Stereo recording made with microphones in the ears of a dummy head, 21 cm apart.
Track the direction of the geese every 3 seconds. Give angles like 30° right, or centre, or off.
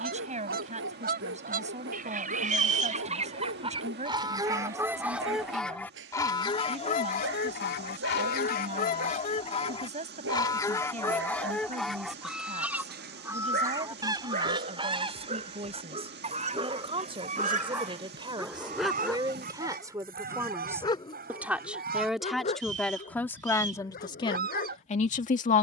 40° right, 10° right, 40° left, 20° left, 10° right, 30° right, 40° right, 40° right, 40° right.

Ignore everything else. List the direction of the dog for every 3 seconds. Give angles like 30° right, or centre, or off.
50° right, 50° right, 50° right, 50° right, 40° right, 20° right, 10° left, 30° left, 40° left.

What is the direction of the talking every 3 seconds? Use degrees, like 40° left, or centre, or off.
30° right, 30° right, 30° right, 30° right, 30° right, 30° right, 20° right, centre, 30° left.